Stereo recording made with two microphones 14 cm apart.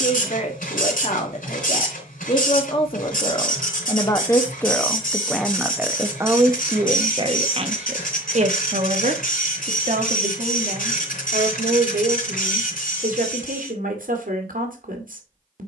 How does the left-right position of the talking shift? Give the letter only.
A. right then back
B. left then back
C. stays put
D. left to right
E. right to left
D.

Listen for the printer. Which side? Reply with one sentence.
You can hear the printer on the left.